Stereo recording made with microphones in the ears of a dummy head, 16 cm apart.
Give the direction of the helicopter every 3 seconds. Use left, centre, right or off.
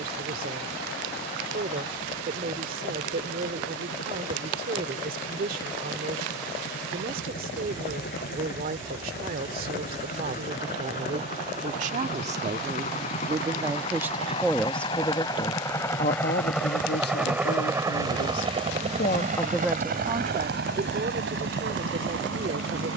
left, left, left, left, left, centre, right, right.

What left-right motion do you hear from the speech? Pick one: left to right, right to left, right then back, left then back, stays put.
left then back.